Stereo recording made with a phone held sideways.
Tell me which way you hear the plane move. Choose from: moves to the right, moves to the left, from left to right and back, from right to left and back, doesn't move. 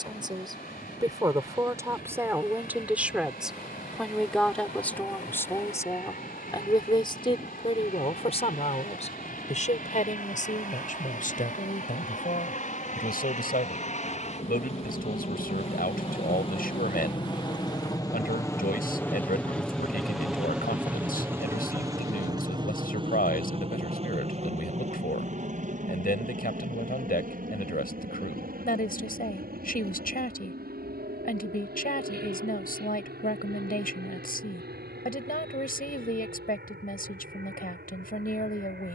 moves to the right.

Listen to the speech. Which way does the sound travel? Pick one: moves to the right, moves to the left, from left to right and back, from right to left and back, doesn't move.
moves to the left.